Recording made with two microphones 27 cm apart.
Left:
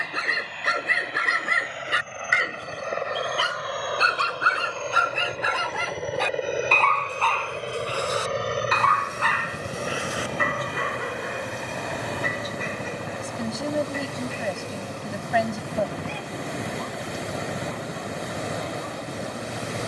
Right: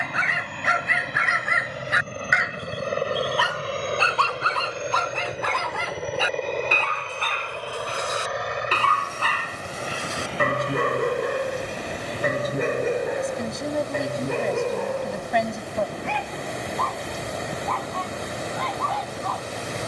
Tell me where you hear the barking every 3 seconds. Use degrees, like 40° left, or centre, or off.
40° left, 10° left, 20° right, 50° right, 60° right, 70° right, 80° right.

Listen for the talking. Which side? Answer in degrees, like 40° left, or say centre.
centre.